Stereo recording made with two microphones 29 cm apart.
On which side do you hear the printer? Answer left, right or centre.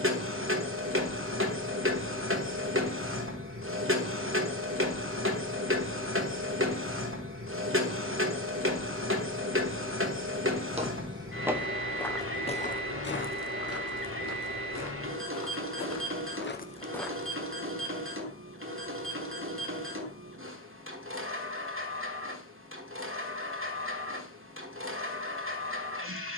right.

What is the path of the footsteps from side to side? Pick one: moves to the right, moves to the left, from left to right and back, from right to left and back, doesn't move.
from right to left and back.